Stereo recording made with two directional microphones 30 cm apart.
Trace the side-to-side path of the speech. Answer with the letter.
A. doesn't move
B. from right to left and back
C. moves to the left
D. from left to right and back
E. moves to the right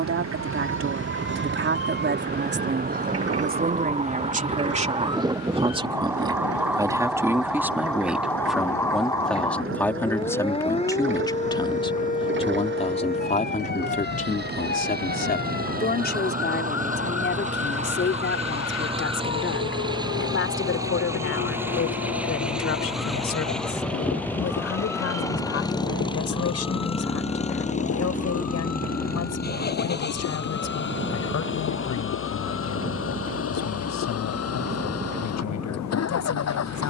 C.